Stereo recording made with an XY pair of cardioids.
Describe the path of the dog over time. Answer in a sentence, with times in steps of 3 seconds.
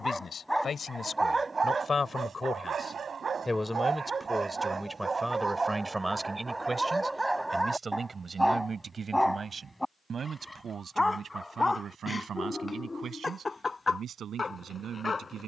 You can hear the dog on the right from 0 s, in the centre from 6 s and on the left from 12 s.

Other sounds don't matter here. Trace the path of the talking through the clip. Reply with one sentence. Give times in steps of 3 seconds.
You can hear the talking on the left from 0 s, in the centre from 3 s and on the right from 6 s.